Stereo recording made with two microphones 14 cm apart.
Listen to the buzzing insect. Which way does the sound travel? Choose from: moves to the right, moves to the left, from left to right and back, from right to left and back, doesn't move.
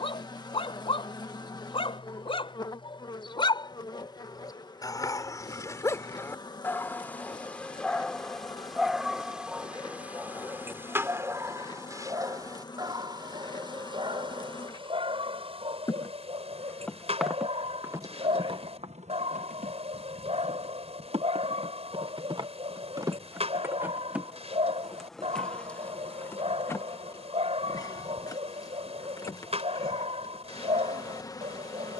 from left to right and back.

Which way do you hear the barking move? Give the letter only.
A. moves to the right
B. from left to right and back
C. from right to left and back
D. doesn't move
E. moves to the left
A.